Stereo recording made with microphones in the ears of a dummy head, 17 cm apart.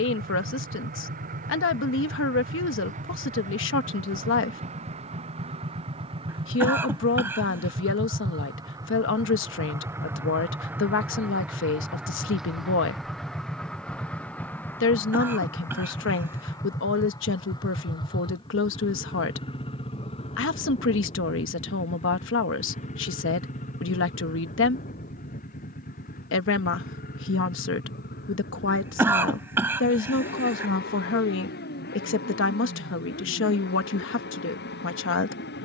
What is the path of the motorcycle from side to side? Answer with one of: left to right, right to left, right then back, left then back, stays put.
right to left.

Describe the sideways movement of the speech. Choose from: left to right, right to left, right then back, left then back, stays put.
stays put.